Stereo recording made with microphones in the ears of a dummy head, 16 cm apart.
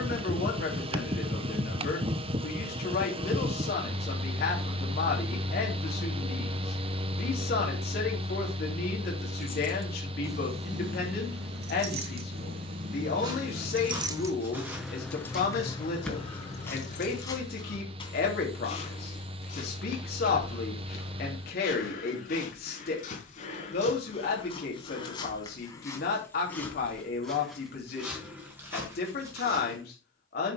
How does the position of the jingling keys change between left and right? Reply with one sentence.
You can hear the jingling keys move from left to right and back again.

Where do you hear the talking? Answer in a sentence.
You can hear the talking on the left.